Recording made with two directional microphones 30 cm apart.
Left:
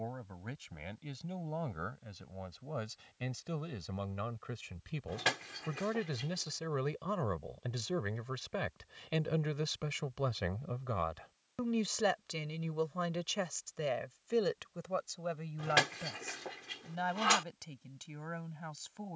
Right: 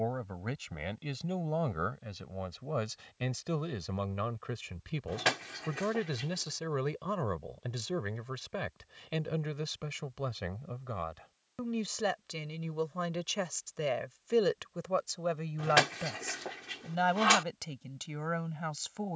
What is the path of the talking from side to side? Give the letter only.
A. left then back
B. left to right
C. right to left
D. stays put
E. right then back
A.